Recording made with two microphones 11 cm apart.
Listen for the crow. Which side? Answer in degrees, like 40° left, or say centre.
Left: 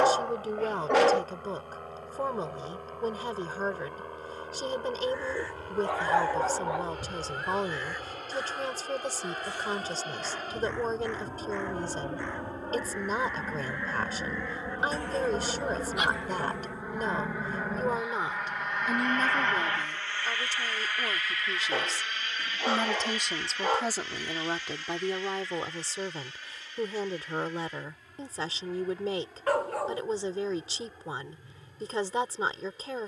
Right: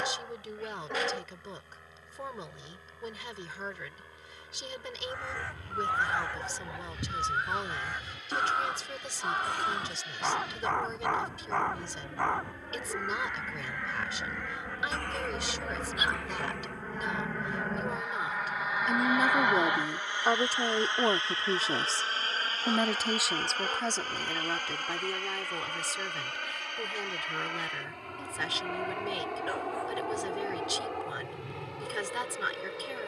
60° right.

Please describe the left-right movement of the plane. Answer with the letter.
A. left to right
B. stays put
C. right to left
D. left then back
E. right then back
A.